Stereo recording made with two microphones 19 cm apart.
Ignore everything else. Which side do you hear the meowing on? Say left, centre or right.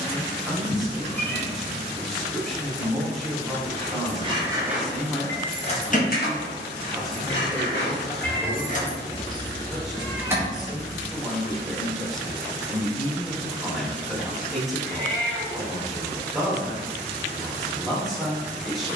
centre.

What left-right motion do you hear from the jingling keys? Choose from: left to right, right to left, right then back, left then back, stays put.
left then back.